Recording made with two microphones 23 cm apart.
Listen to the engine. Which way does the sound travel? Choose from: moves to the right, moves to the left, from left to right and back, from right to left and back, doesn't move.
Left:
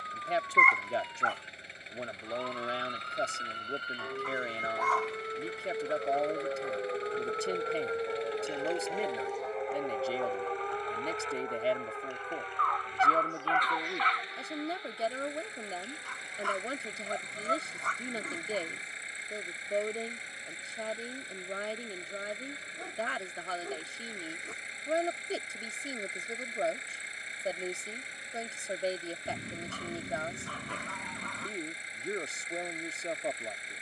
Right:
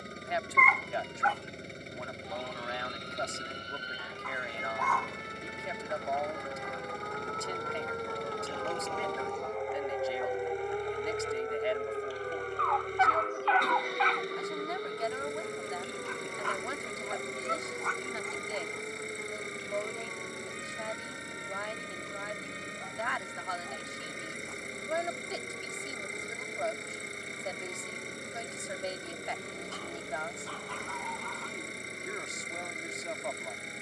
doesn't move.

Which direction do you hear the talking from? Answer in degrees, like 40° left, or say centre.
30° left.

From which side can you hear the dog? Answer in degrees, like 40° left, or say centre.
50° left.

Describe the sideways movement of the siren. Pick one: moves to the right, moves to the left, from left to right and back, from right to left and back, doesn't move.
moves to the right.